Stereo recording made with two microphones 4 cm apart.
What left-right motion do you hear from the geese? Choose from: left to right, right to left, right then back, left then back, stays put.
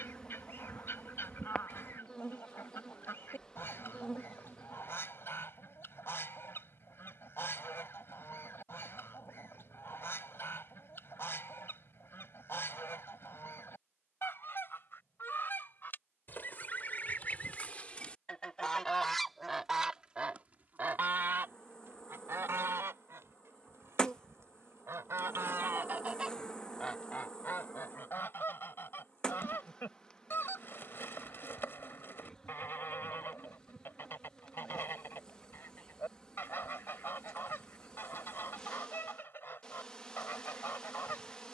right then back.